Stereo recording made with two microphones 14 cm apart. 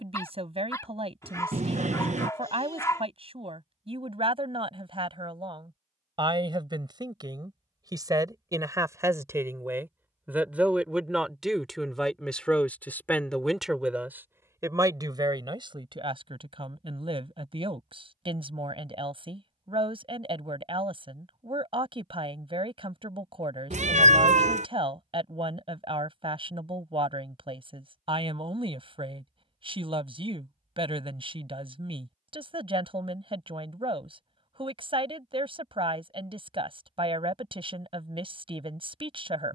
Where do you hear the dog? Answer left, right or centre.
left.